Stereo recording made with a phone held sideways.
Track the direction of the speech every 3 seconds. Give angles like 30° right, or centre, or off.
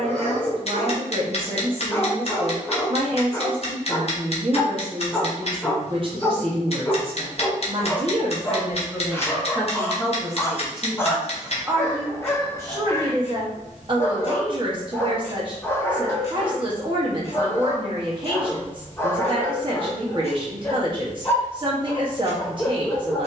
40° right, 40° right, 30° right, centre, 30° right, 40° right, 40° right, 40° right.